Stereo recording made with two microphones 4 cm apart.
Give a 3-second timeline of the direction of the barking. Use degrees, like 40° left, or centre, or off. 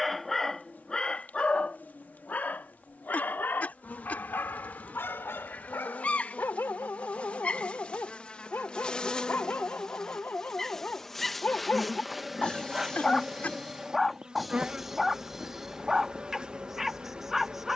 30° left, 60° left, 60° left, 40° left, 10° left, 10° right.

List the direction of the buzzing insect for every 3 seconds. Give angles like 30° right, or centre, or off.
50° left, 40° left, 30° left, 10° left, 10° right, 20° right.